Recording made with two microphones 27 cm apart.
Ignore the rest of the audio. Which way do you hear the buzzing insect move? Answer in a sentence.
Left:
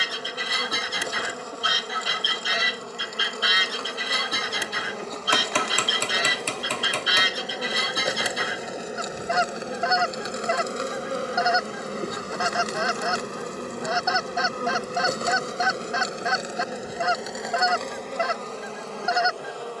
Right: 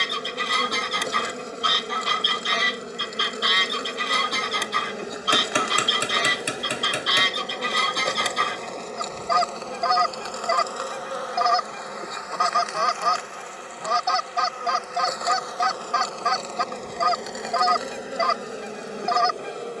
In this clip you hear the buzzing insect move from right to left and back again.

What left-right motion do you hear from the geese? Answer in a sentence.
You can hear the geese stay in one place.